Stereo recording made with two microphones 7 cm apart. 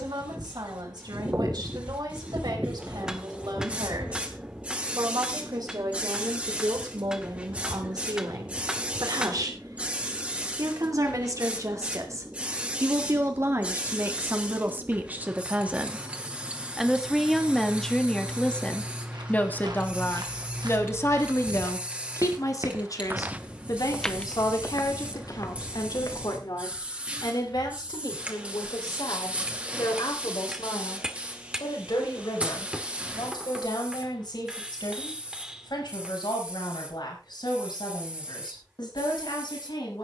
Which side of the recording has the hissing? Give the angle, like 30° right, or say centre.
20° right.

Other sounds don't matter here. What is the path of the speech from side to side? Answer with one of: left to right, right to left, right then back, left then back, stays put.
right to left.